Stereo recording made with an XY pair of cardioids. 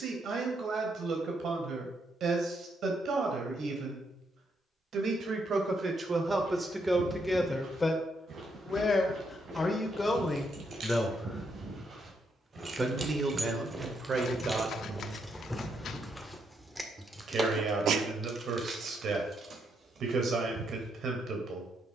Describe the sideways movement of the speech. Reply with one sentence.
You can hear the speech go left and come back.